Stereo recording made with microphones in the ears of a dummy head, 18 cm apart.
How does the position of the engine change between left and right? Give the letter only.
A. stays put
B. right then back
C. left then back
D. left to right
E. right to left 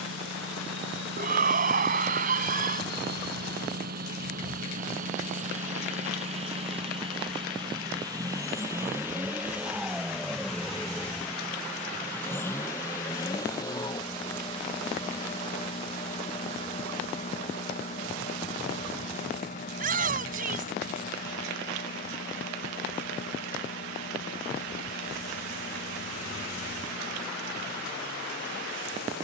E.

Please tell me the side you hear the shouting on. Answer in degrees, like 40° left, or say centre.
50° right.